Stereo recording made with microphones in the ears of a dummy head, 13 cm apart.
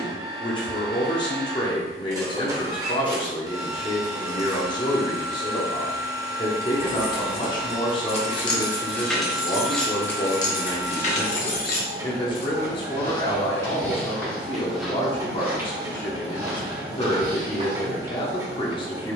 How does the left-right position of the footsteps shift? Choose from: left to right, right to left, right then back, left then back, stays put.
left to right.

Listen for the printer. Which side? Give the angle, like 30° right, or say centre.
20° right.